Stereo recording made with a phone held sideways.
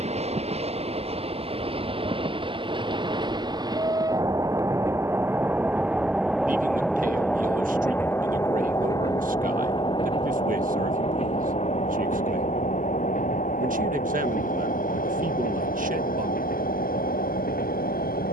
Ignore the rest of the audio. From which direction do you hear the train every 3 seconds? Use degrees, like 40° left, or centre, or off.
40° right, 20° right, 10° left, 40° left, 60° left, 70° left.